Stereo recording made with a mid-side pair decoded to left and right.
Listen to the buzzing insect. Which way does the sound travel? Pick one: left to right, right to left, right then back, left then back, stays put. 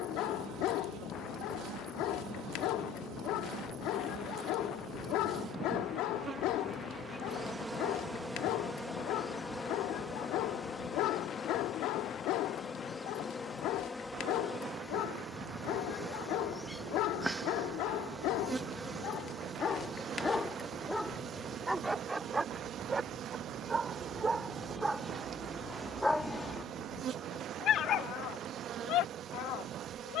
left then back.